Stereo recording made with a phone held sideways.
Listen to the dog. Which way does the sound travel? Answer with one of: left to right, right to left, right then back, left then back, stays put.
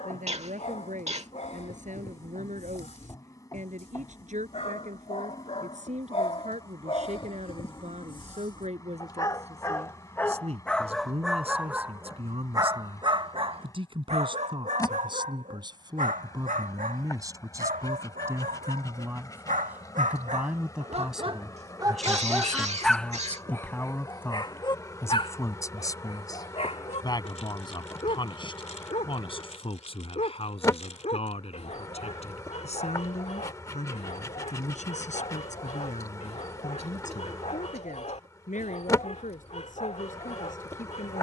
right then back.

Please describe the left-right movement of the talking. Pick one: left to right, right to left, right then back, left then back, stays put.
right to left.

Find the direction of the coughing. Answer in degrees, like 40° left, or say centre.
50° right.